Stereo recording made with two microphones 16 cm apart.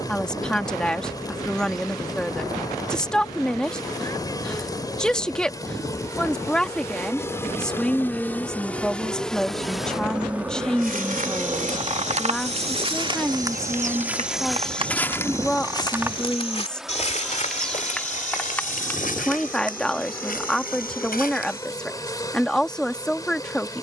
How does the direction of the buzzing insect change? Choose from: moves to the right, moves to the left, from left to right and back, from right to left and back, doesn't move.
from left to right and back.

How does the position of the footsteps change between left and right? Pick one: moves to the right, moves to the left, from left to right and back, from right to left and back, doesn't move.
moves to the left.